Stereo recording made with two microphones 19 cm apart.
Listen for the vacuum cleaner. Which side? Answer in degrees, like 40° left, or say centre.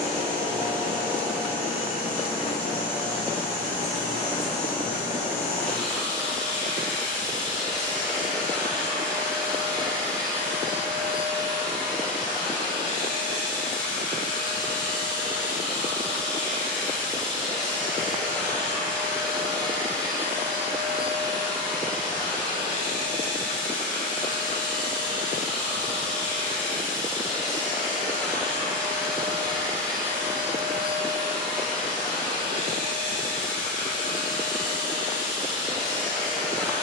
centre.